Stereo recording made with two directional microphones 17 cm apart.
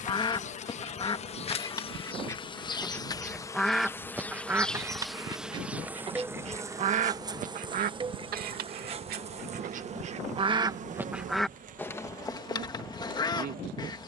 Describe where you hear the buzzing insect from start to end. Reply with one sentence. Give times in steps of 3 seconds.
In this clip you hear the buzzing insect on the left from 0 s, in the centre from 3 s and on the right from 6 s.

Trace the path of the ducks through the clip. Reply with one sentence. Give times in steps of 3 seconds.
In this clip you hear the ducks on the left from 0 s, in the centre from 3 s, on the right from 6 s and on the left from 12 s.